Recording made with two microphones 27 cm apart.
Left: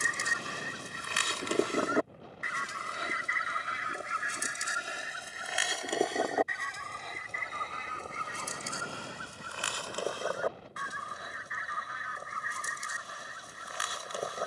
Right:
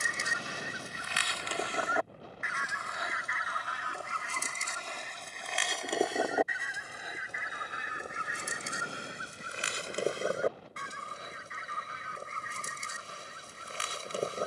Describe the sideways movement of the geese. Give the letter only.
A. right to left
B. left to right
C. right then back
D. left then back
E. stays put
B.